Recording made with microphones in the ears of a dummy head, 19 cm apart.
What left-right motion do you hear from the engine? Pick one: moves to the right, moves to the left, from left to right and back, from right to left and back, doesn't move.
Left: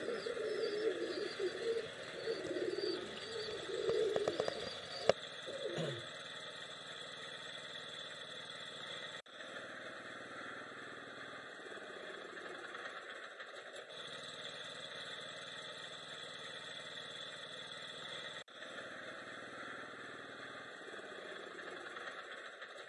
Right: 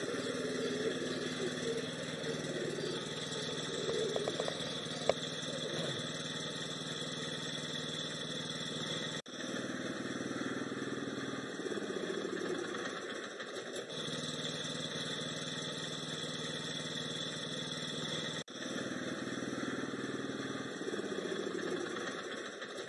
doesn't move.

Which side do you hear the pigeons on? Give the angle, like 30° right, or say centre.
10° left.